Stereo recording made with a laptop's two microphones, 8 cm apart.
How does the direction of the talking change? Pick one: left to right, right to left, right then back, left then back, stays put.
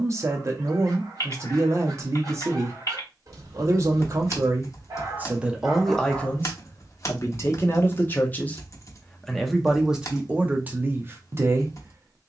left then back.